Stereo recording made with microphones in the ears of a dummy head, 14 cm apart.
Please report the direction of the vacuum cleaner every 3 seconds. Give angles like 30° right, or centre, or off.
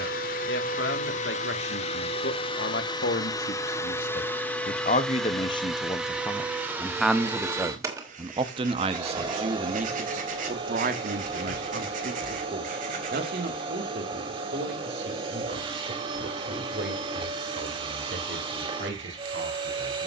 40° left, 10° left, 10° right, 30° right, 30° right, 30° right, 30° right.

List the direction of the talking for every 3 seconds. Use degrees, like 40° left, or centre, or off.
70° left, 40° left, 10° right, 50° right, 60° right, 70° right, 70° right.